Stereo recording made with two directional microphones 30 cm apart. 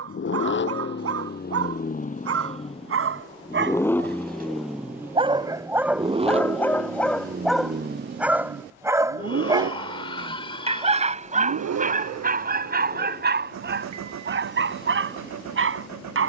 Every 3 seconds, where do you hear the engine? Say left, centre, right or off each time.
left, centre, right, right, right, right.